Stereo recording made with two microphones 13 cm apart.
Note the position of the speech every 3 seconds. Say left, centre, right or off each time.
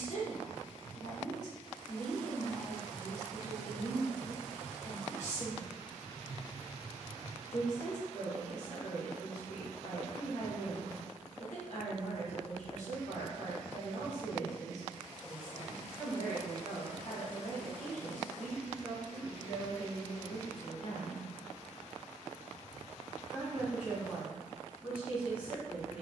left, left, left, left, left, left, left, centre, centre.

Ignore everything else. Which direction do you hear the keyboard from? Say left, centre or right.
right.